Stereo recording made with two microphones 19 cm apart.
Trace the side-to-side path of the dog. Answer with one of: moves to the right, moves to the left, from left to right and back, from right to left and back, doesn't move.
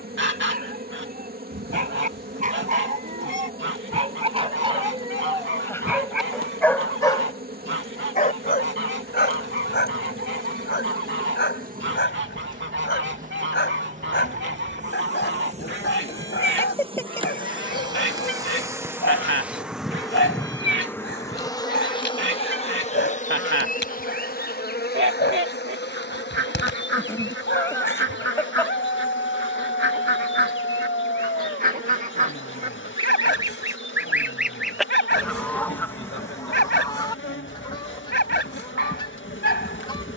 moves to the left.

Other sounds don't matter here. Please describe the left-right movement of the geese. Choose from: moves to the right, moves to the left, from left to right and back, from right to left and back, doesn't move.
moves to the left.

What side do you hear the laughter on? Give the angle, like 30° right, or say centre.
10° left.